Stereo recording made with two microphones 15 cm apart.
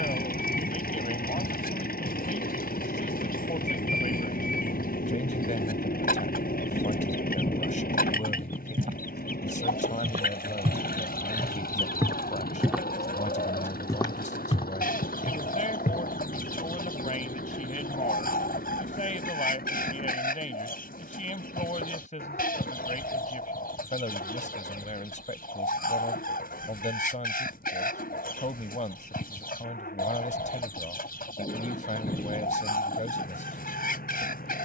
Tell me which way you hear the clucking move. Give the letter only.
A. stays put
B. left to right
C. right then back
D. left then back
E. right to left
A.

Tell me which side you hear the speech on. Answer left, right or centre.
left.